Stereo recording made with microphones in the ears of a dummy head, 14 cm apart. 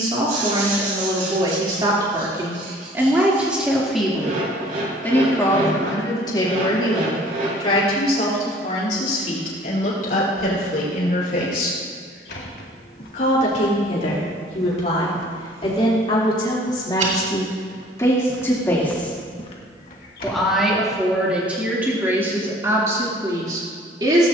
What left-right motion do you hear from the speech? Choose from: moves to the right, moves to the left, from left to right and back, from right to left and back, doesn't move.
from right to left and back.